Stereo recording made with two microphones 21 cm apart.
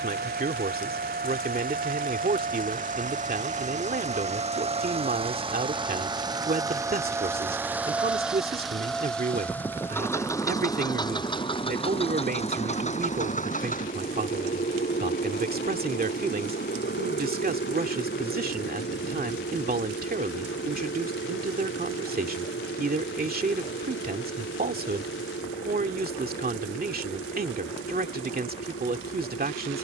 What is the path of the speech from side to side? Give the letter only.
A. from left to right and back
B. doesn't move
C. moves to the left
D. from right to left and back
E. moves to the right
B.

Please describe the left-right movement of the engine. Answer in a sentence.
You can hear the engine move from right to left.